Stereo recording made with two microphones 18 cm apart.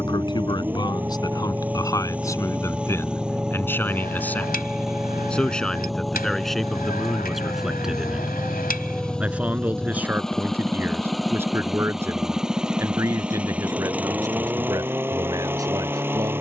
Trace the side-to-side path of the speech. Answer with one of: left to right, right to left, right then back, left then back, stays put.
left to right.